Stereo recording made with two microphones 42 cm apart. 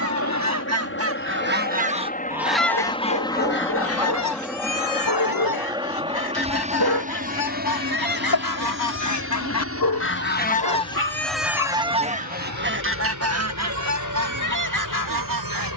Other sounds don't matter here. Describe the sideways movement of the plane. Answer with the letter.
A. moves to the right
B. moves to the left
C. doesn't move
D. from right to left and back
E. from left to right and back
A.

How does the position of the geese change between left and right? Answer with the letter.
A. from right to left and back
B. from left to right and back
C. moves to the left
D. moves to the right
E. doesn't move
A.